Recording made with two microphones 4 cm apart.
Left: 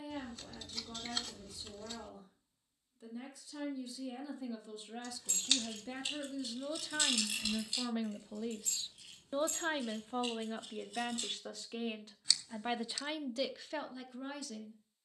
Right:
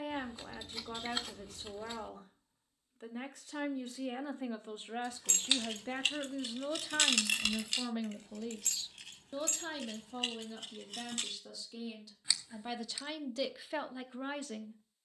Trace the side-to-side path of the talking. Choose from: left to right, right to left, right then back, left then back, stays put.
left then back.